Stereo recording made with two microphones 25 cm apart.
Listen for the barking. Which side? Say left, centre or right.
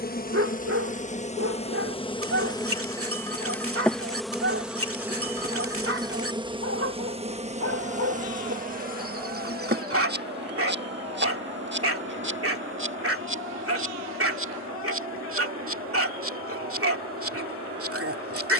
right.